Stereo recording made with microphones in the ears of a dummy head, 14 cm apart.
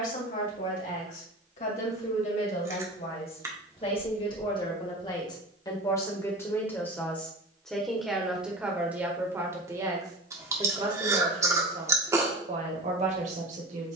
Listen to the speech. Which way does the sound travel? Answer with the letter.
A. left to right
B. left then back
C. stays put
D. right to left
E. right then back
A.